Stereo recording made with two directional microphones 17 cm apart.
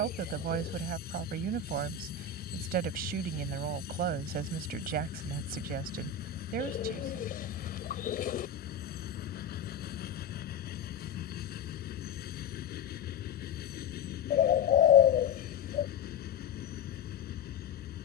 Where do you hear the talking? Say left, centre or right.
right.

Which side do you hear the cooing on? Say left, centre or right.
left.